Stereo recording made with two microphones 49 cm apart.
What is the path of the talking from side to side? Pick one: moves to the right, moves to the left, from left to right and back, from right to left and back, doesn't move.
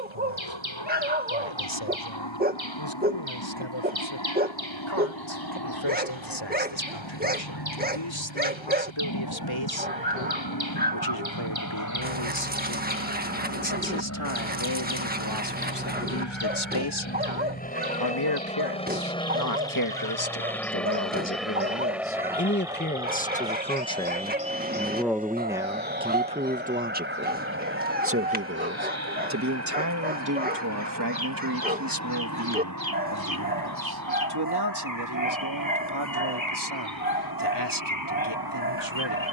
moves to the right.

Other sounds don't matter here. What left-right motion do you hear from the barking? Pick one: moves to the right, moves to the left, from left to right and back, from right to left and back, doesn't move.
doesn't move.